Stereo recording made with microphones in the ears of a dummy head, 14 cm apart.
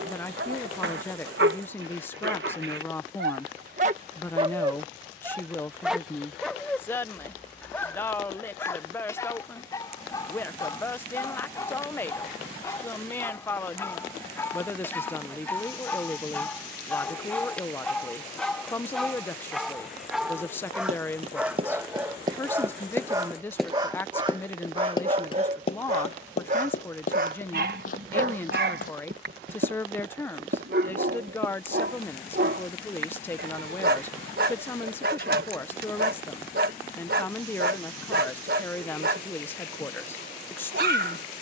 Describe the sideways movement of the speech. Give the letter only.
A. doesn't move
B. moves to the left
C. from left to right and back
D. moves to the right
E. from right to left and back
A.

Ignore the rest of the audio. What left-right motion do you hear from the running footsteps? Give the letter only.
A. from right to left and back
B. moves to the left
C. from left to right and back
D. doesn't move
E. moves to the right
B.